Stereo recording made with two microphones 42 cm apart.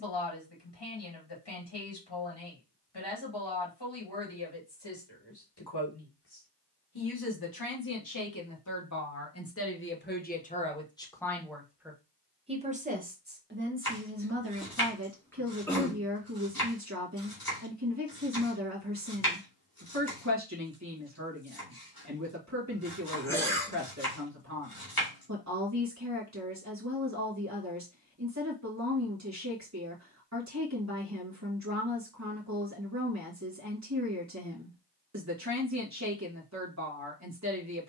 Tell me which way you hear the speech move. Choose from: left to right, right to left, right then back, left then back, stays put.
left to right.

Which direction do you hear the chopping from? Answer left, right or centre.
left.